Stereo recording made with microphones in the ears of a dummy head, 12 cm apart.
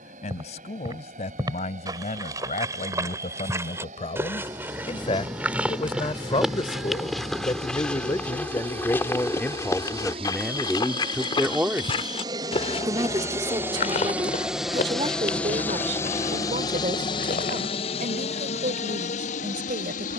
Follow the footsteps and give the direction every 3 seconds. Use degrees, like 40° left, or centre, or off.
30° right, 20° right, centre, 30° left, 60° left, 70° left, off.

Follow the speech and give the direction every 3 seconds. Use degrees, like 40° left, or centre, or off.
50° left, 50° left, 30° left, centre, 30° right, 50° right, 70° right.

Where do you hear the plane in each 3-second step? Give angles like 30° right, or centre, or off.
60° right, 60° right, 50° right, 40° right, 20° right, 30° left, 60° left.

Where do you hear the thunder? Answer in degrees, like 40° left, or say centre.
centre.